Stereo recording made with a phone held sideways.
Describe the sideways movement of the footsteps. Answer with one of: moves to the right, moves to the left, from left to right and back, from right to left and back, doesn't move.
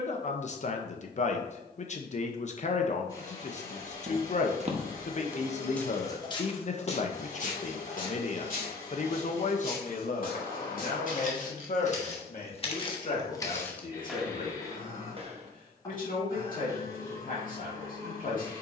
from right to left and back.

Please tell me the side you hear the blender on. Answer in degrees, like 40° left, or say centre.
20° left.